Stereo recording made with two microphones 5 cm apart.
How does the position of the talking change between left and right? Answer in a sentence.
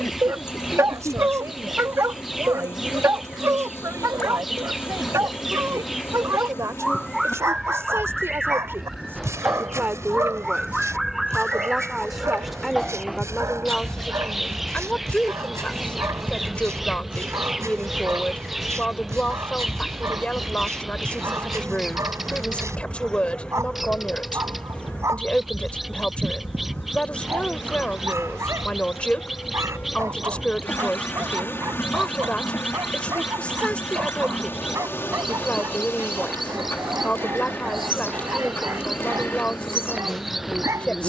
In this clip you hear the talking travel towards the left.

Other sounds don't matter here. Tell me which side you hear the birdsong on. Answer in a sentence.
In this clip you hear the birdsong in the centre.